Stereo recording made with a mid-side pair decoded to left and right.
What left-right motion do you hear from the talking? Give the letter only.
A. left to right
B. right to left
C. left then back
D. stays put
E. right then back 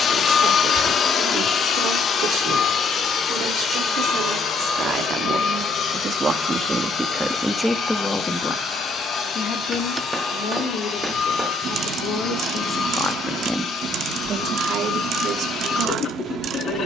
C.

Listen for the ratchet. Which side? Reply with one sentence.
You can hear the ratchet on the right.